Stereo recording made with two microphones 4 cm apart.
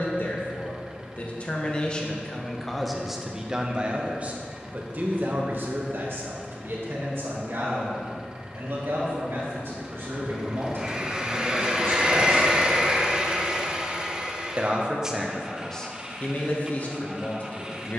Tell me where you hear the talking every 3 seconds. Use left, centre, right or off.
left, right, right, right, right, left.